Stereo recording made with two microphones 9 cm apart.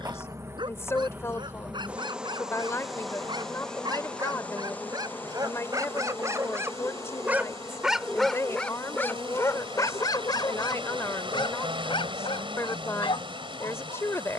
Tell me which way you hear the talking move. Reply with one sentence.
You can hear the talking stay put.